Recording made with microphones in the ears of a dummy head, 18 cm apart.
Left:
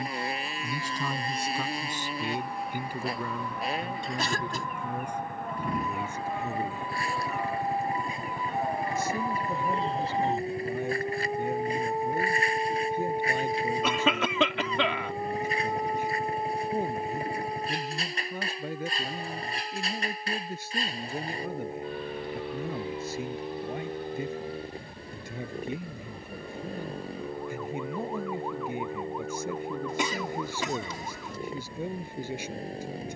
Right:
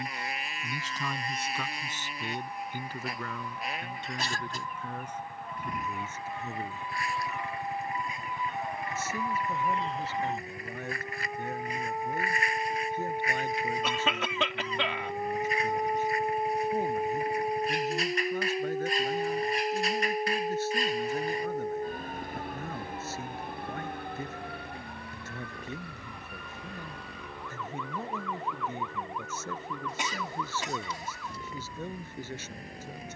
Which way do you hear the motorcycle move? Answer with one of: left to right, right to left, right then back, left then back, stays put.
stays put.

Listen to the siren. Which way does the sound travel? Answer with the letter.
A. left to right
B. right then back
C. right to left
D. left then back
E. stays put
A.